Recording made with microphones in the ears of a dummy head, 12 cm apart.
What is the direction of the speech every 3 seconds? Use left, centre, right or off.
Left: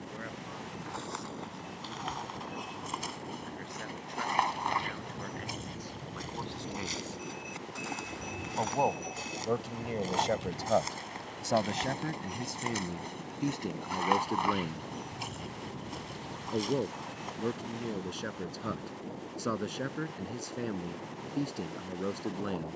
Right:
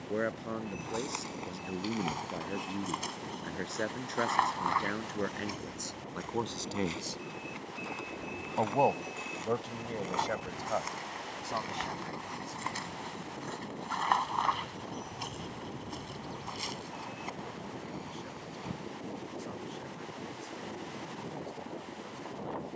right, right, right, left, left, left, left, left.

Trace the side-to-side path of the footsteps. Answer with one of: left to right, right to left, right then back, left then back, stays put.
left then back.